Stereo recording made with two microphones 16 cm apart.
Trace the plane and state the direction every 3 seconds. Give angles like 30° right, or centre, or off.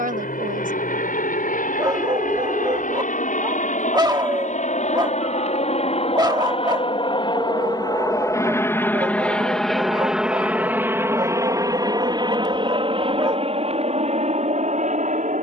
70° left, 50° left, 30° left, 10° right, 40° right.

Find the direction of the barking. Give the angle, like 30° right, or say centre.
30° right.